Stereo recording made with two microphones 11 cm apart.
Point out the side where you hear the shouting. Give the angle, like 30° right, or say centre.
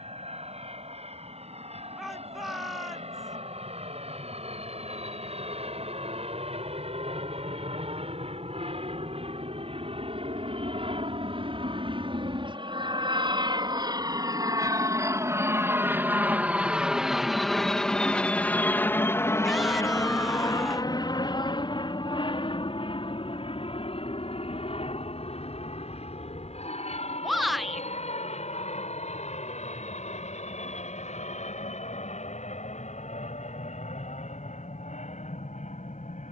centre.